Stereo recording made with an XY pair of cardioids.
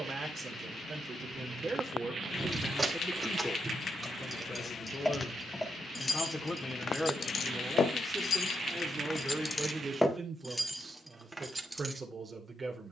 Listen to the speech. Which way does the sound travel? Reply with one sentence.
In this clip you hear the speech go left and come back.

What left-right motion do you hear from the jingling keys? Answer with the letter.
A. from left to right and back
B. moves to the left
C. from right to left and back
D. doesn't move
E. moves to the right
C.